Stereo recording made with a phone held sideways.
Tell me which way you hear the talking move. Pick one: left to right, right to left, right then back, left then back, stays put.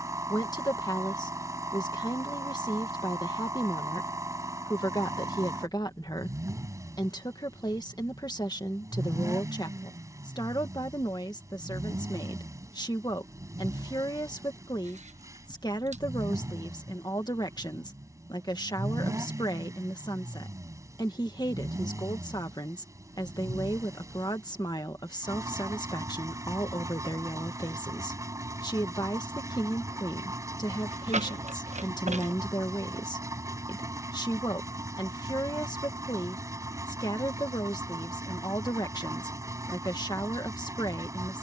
stays put.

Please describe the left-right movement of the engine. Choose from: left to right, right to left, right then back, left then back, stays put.
stays put.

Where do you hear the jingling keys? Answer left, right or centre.
right.